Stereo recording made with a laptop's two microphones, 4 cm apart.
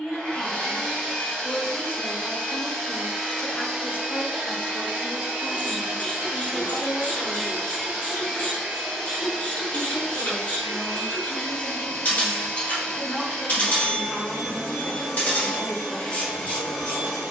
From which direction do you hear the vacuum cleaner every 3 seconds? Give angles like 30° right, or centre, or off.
10° left, 20° right, 20° right, 10° left, 10° left, 10° left.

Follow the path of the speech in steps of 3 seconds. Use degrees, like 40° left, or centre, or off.
60° left, 60° left, 60° left, 40° left, 10° left, 10° right.